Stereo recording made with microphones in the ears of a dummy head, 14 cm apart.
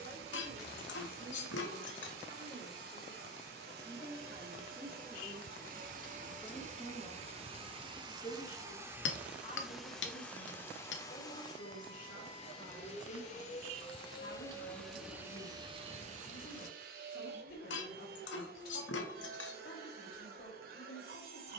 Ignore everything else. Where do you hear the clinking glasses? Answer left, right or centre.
left.